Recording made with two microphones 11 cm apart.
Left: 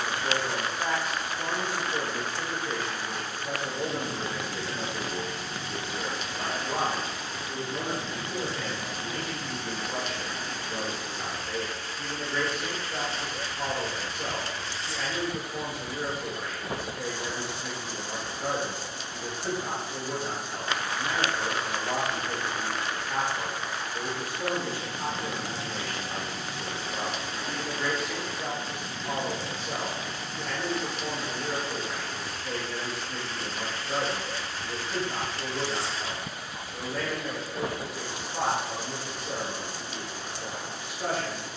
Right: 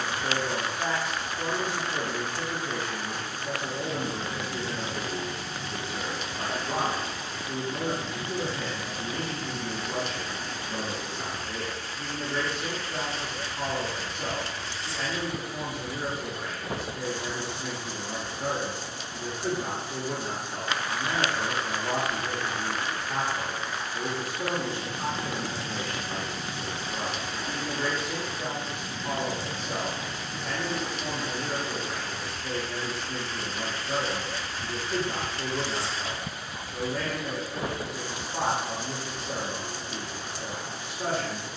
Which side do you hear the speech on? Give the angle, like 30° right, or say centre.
30° right.